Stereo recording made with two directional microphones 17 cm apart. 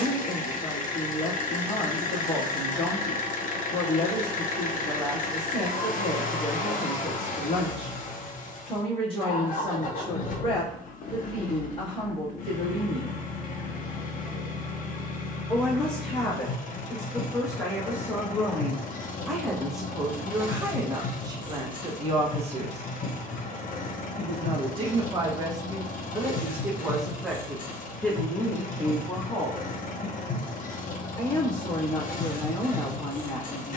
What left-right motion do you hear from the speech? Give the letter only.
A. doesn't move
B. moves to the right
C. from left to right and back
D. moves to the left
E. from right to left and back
C.